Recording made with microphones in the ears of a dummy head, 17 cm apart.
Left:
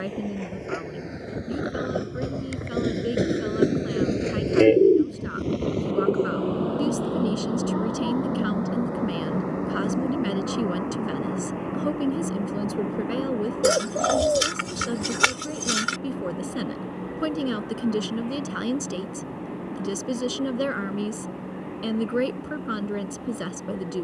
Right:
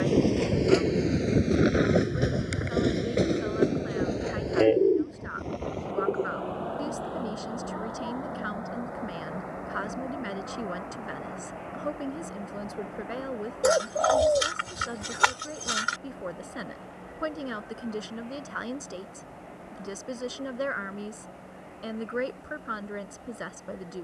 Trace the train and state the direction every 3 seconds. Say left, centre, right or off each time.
right, left, left, left, left, left, left, left.